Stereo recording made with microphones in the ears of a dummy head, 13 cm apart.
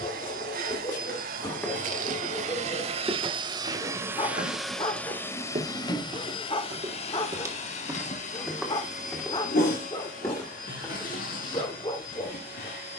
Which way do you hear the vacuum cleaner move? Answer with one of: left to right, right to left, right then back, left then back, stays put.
right to left.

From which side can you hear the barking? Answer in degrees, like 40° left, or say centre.
30° left.